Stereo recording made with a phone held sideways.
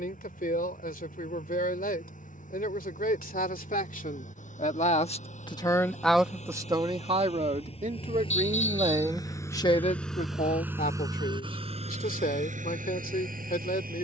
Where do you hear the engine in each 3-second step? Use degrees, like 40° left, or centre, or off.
60° left, 60° left, 40° left, 10° right, 60° right.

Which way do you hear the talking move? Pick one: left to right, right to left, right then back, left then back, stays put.
right then back.